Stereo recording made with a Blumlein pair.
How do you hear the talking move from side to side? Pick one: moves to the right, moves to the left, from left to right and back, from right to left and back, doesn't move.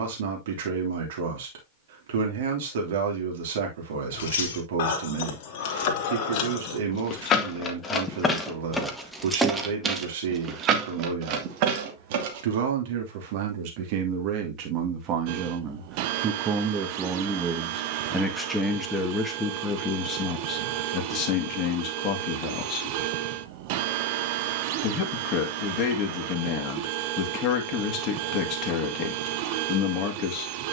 moves to the left.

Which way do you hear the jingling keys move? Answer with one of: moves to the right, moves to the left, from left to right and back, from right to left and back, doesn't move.
moves to the right.